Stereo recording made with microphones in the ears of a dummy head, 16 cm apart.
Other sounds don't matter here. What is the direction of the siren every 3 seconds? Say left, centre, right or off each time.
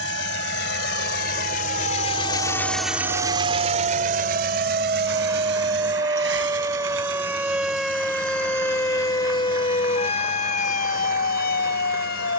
right, right, centre, left.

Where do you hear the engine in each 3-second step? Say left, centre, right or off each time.
left, right, right, right.